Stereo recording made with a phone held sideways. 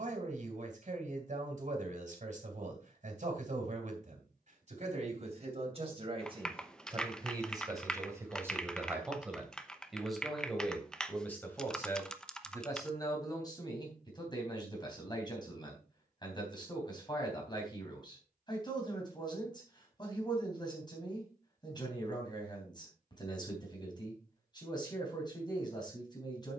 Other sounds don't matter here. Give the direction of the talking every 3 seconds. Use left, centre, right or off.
right, right, right, centre, left, left, left, left, left.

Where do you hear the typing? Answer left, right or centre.
centre.